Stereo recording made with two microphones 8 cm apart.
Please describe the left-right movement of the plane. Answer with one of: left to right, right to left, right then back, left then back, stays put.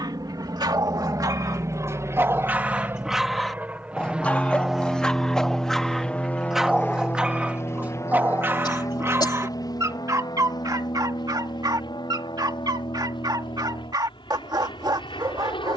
right to left.